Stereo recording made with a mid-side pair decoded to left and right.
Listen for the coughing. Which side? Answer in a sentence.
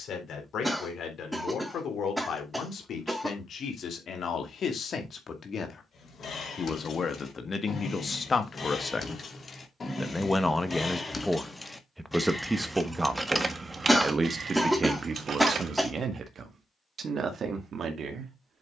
In this clip you hear the coughing in the centre.